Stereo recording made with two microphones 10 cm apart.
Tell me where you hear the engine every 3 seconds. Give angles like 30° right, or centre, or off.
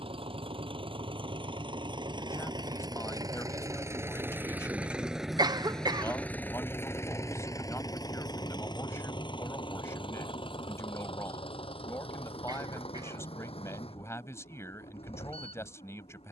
50° right, 20° right, 30° left, 60° left, 70° left, 70° left.